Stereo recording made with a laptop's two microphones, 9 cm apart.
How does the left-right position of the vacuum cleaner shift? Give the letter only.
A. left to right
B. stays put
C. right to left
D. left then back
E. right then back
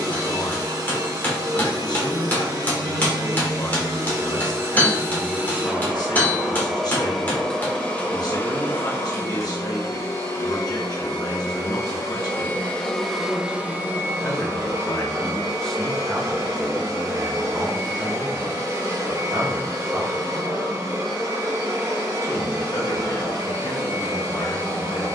D.